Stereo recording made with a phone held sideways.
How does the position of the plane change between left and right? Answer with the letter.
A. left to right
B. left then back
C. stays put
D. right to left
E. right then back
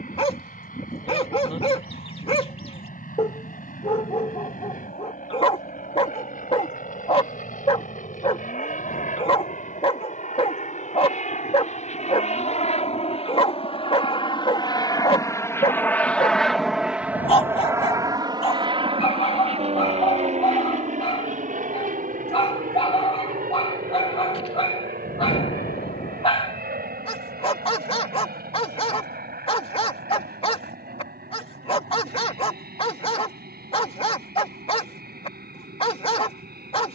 A.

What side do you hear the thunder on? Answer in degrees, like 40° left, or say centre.
70° left.